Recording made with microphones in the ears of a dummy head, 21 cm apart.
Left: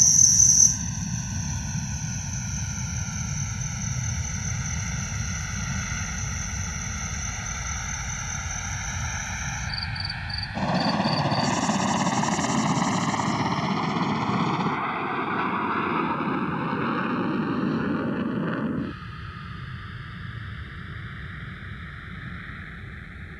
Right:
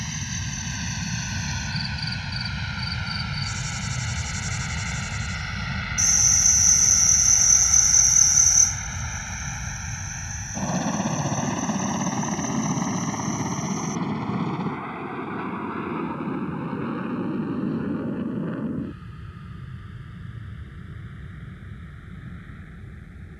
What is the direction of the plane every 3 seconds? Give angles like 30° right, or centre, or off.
50° right, 30° right, centre, 20° left, 30° left, 40° left, 50° left, 50° left.